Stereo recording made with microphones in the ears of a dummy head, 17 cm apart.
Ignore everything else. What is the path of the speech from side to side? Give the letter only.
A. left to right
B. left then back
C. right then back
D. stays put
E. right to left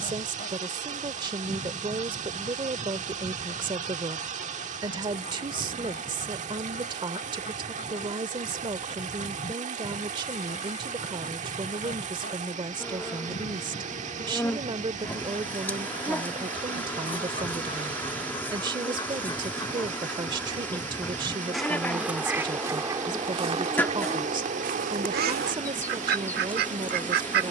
D.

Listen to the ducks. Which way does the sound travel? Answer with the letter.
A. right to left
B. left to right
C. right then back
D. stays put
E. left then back
B.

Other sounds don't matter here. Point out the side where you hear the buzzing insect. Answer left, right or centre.
centre.